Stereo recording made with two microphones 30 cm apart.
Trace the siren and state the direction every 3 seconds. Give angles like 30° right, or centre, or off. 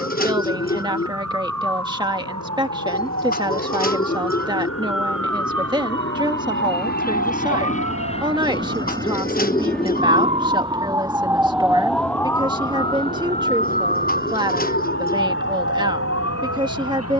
70° right, 60° right, 50° right, 20° right, 20° left, 50° left.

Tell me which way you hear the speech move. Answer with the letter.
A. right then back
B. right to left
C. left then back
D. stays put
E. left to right
D.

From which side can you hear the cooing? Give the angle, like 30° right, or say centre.
30° left.